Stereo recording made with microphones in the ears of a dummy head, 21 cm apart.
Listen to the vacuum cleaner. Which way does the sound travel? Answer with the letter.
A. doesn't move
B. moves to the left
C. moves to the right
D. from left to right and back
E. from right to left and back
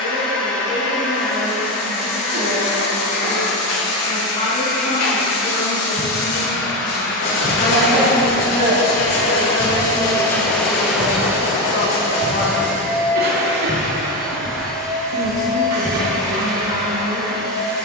C.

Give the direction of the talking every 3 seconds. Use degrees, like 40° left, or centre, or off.
70° left, 70° left, 40° left, 20° left, 50° left, 70° left.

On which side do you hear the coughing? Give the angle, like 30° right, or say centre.
80° right.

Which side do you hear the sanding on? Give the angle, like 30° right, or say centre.
70° left.